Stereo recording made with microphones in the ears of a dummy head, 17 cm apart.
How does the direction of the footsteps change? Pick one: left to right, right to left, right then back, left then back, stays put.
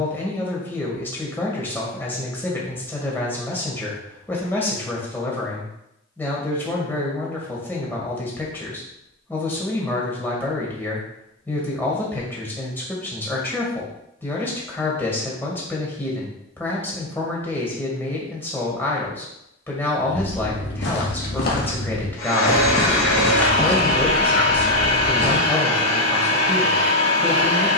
left to right.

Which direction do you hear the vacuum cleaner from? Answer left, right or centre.
left.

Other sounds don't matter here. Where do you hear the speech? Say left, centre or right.
centre.